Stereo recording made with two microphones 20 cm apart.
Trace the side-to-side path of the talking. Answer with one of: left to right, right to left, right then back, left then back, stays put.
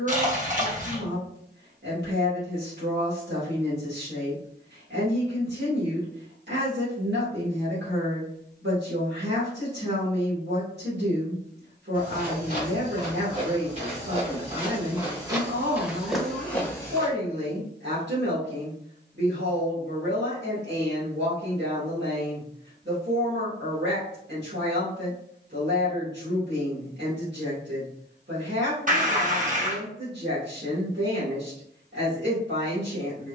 stays put.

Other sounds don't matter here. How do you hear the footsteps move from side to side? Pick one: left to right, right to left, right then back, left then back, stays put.
right to left.